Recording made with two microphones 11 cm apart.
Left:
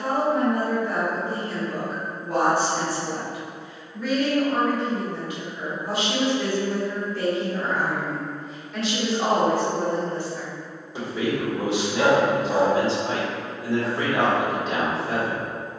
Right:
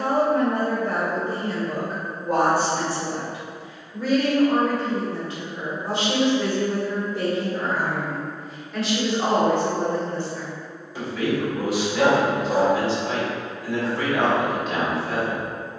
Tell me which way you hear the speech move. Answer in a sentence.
In this clip you hear the speech travel towards the left.